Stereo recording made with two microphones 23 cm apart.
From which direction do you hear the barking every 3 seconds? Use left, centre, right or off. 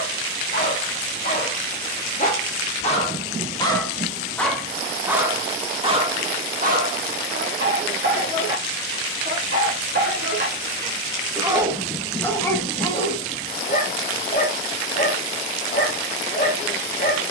left, centre, right, right, left, left.